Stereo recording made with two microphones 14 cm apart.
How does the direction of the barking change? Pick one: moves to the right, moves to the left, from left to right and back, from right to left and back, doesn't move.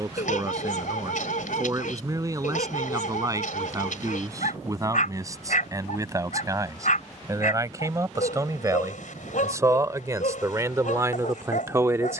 doesn't move.